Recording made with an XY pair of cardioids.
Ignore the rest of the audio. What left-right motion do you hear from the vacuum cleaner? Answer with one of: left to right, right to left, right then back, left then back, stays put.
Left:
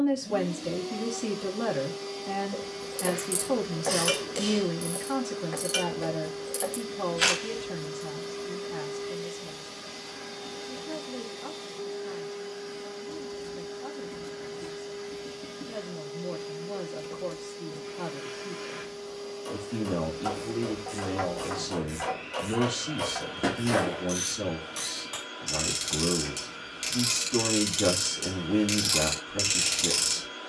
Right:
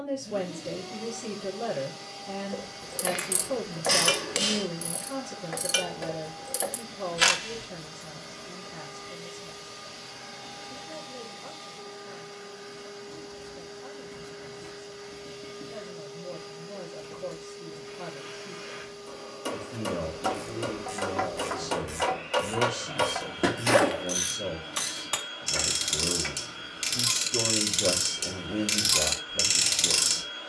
stays put.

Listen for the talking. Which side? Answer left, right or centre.
left.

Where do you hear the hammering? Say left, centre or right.
right.